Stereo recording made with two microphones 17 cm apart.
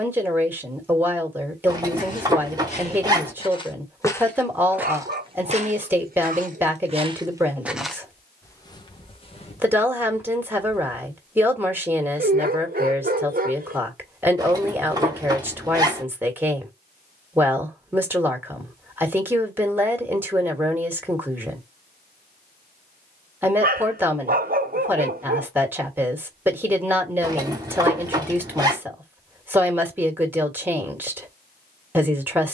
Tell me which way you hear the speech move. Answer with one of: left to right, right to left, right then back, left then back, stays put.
stays put.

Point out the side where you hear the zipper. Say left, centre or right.
right.